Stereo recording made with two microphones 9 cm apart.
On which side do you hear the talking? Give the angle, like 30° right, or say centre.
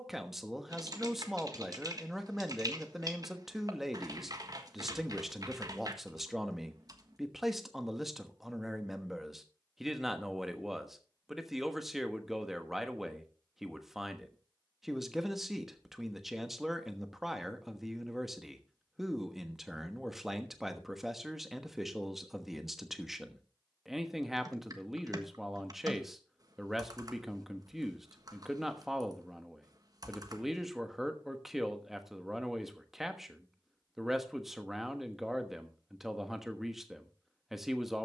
centre.